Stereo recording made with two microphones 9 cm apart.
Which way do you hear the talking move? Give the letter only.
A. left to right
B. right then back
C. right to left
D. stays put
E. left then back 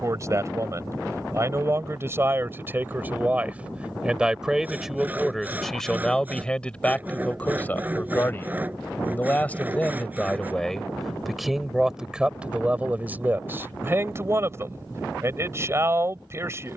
E.